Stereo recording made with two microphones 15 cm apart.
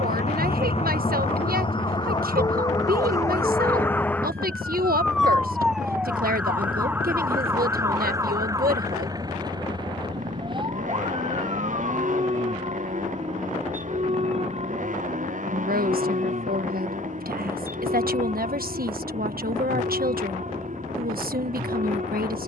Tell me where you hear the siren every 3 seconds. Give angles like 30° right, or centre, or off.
30° left, 10° left, 20° right, 30° right, 40° right, 50° right, 50° right, 50° right.